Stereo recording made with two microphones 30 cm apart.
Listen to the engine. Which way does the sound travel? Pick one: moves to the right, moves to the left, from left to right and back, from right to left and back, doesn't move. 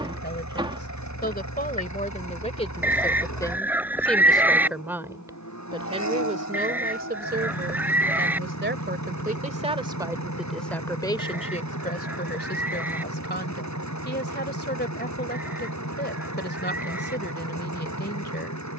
doesn't move.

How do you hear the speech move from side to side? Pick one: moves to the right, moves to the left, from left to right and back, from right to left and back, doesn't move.
from left to right and back.